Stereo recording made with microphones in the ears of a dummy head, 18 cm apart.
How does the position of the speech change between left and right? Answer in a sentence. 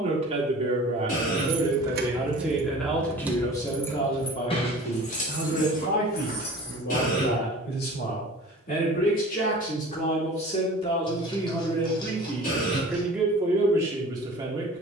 You can hear the speech go left and come back.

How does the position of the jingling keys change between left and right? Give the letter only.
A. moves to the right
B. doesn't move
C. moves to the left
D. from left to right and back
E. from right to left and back
C.